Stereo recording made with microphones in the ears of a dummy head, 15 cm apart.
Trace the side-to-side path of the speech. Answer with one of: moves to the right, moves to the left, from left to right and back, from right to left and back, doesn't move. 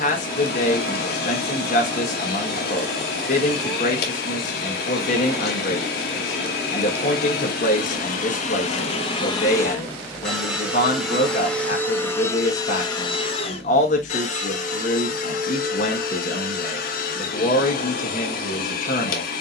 doesn't move.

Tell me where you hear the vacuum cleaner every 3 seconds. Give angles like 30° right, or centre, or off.
60° left, 60° left, 50° left, 10° left, 30° left, 50° left, 50° left.